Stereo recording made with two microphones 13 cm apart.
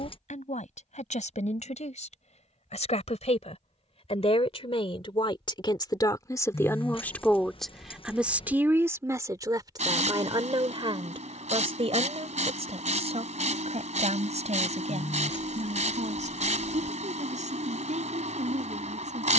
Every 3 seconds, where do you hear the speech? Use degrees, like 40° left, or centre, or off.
70° left, 50° left, 10° left, 40° right, 60° right, 70° right, 70° right.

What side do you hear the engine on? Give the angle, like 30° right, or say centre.
70° right.